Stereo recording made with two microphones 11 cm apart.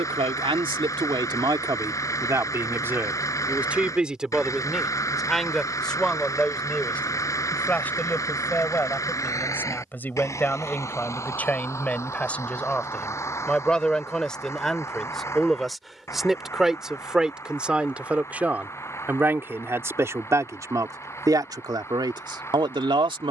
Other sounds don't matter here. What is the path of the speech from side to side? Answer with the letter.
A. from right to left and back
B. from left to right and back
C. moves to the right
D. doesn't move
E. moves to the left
A.